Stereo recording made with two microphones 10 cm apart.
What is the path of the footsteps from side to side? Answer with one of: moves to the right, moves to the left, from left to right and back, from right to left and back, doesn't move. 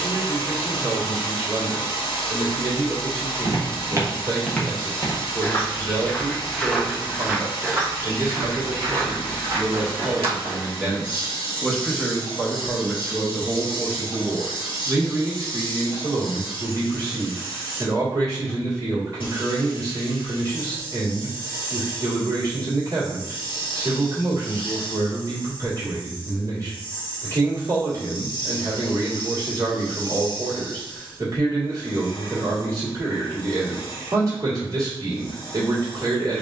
from right to left and back.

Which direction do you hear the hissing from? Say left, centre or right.
left.